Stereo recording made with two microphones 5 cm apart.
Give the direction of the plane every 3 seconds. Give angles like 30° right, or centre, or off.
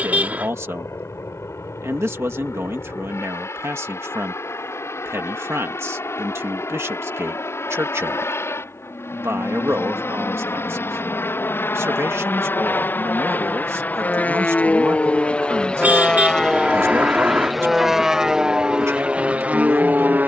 70° left, 70° left, 60° left, 50° left, 40° left, 10° left, 20° right.